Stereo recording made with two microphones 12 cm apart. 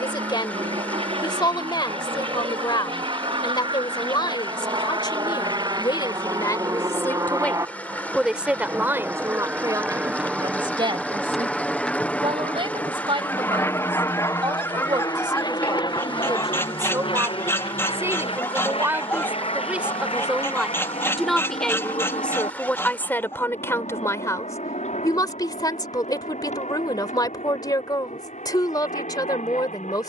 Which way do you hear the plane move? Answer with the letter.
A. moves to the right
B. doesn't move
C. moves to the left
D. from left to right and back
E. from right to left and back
C.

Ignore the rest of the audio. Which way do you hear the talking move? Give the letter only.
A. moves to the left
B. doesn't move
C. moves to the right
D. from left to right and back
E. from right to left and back
D.